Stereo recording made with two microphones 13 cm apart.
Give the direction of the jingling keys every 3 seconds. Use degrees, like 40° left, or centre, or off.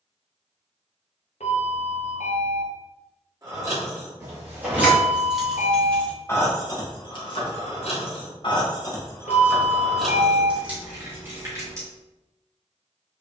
off, 10° right, 40° left, centre, off.